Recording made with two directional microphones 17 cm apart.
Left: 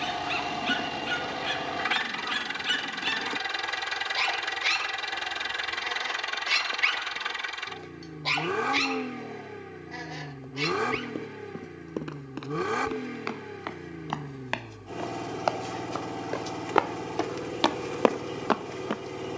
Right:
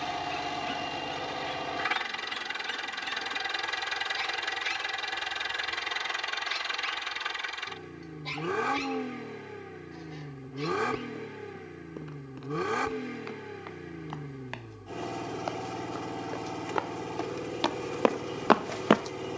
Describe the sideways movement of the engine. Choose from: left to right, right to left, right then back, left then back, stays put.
stays put.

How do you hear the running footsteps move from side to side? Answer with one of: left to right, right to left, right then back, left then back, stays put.
left to right.